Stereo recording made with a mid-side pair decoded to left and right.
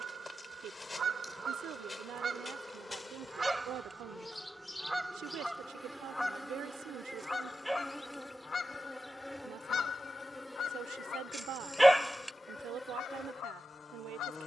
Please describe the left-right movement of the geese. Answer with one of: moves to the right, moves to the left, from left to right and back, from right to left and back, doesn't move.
moves to the left.